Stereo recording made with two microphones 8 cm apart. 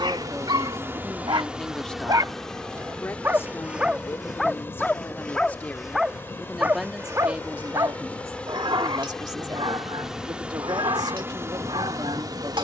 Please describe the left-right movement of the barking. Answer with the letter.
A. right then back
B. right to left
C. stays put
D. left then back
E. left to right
D.